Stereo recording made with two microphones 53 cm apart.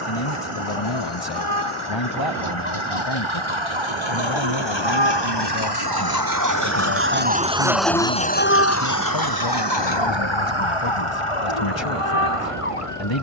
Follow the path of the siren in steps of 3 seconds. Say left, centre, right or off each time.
right, right, centre, left, left.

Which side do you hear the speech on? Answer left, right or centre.
left.